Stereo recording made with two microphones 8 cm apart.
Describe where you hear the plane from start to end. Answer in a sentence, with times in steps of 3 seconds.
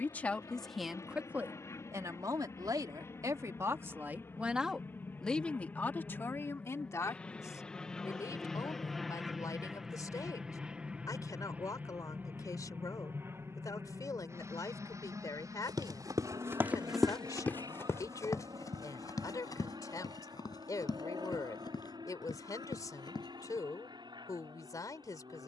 You can hear the plane on the left from 0 s, in the centre from 6 s and on the right from 12 s.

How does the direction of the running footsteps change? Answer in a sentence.
You can hear the running footsteps travel towards the left.